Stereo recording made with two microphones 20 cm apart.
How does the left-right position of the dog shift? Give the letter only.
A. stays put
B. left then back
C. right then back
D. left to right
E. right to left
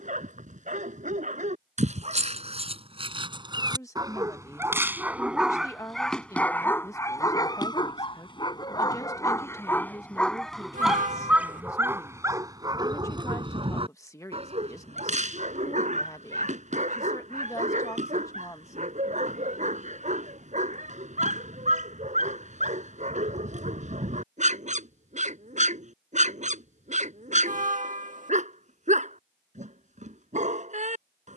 B.